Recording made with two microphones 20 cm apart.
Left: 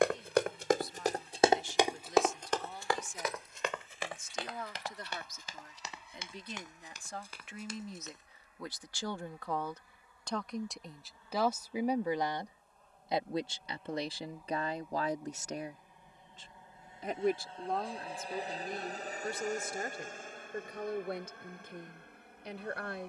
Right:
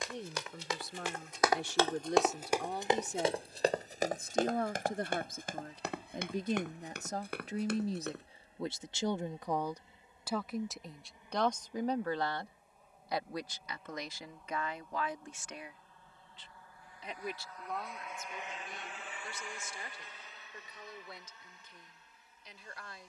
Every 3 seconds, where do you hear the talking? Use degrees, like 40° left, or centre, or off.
70° right, 60° right, 40° right, 10° right, 30° left, 50° left, 60° left, 60° left.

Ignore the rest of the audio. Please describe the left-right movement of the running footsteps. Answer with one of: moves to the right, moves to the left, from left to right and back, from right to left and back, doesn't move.
moves to the right.